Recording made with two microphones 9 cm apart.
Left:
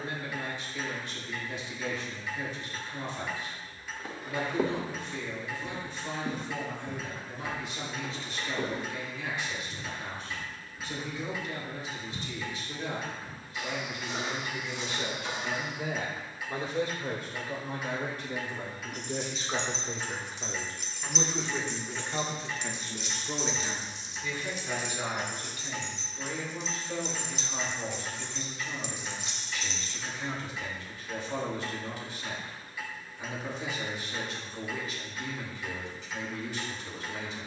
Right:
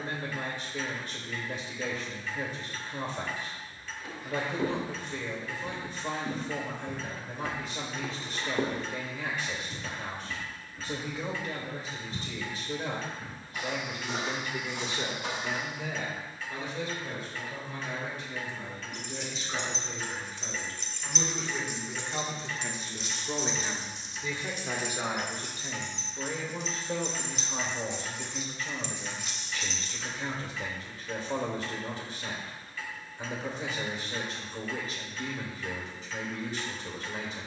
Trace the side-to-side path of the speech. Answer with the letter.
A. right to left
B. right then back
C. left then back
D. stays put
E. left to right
C.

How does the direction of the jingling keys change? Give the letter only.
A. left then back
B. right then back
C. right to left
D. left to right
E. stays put
B.